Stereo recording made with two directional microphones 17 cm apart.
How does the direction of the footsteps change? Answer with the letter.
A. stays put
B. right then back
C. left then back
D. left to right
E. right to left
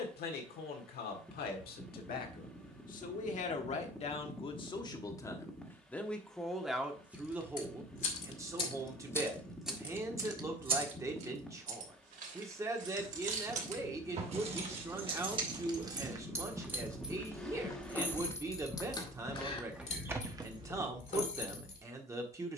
C.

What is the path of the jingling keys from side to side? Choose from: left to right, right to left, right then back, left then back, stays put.
right then back.